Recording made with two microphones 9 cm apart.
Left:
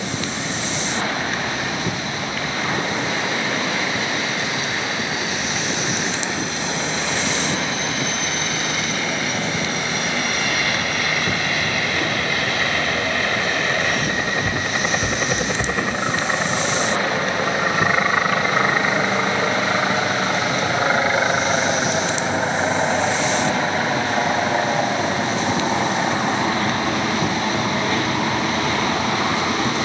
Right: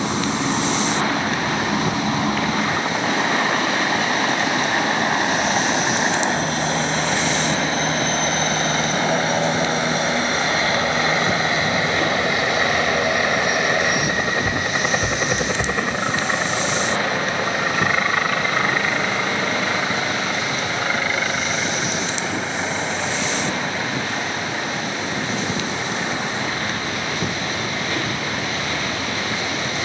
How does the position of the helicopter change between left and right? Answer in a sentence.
In this clip you hear the helicopter move to the left.